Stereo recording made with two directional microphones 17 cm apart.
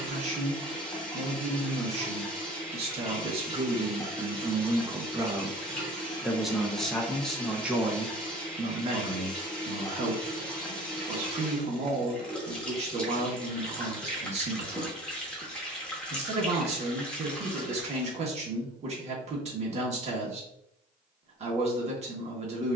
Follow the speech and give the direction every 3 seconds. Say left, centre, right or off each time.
right, right, centre, right, right, right, right, right.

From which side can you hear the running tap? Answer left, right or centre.
centre.